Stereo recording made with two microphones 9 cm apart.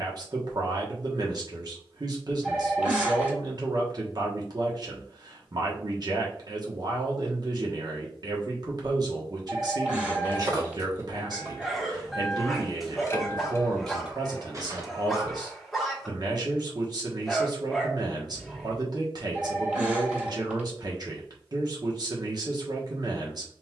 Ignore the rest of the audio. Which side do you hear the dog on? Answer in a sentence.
In this clip you hear the dog in the centre.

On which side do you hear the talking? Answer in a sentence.
You can hear the talking on the right.